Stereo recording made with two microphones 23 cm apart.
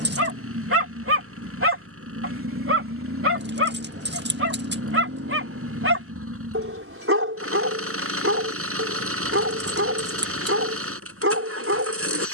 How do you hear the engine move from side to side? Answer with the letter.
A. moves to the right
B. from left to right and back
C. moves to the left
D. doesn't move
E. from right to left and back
D.